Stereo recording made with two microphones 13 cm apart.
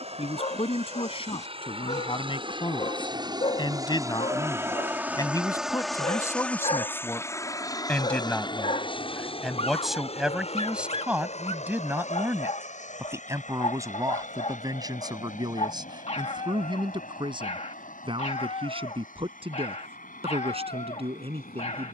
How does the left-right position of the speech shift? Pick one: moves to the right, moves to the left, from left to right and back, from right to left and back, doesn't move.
moves to the right.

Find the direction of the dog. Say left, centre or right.
left.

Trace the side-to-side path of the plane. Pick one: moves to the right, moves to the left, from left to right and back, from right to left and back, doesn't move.
moves to the left.